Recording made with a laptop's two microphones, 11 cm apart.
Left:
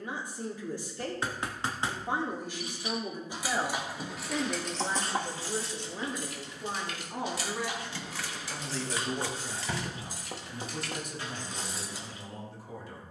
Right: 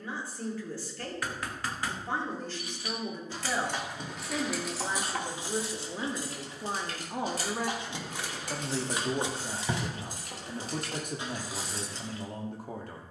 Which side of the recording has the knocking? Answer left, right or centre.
left.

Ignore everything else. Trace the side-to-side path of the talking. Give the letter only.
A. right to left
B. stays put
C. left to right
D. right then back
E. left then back
C.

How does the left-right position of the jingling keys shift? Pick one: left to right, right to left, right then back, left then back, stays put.
right then back.